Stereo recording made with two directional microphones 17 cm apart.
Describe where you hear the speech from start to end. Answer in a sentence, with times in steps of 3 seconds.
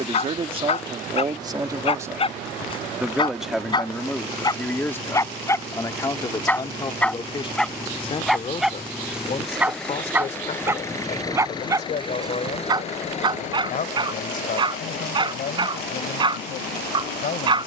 In this clip you hear the speech on the right from 0 s, in the centre from 3 s and on the left from 6 s.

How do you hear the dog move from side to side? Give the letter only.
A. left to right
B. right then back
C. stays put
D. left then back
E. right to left
A.